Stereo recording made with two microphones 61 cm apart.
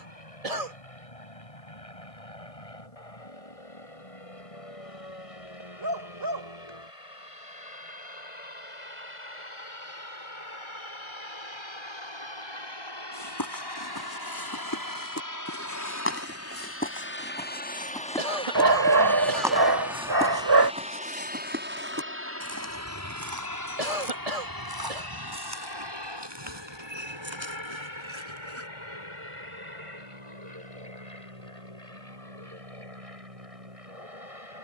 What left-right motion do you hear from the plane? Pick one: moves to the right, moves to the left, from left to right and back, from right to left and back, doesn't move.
moves to the right.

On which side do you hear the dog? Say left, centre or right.
right.